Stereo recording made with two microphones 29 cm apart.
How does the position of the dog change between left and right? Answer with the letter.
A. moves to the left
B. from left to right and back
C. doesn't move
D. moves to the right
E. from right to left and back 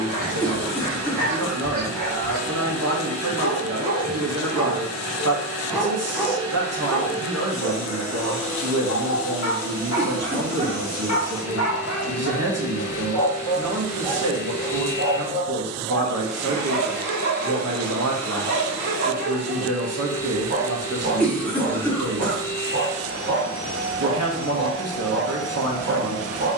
E.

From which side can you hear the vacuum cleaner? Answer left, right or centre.
centre.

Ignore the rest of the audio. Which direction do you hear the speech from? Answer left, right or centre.
right.